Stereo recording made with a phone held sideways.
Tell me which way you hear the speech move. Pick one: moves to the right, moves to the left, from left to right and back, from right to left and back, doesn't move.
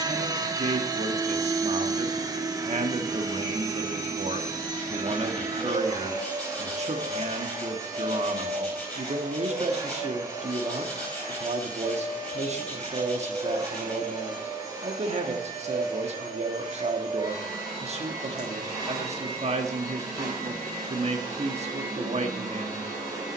doesn't move.